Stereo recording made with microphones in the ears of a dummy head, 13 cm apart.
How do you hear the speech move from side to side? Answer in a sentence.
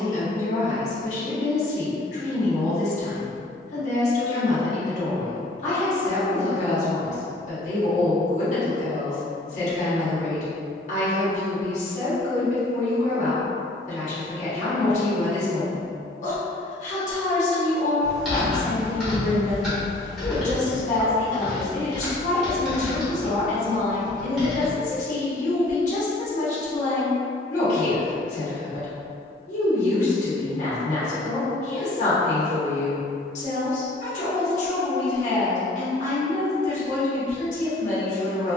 In this clip you hear the speech stay put.